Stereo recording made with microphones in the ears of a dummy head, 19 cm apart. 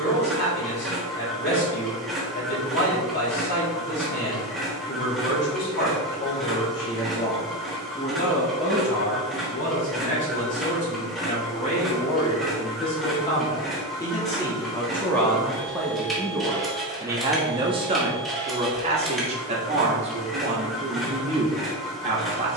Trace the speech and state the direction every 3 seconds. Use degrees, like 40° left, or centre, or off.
50° left, 50° left, 50° left, 40° left, 20° left, 10° right, 30° right, 30° right.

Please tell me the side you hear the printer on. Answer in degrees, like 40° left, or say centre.
centre.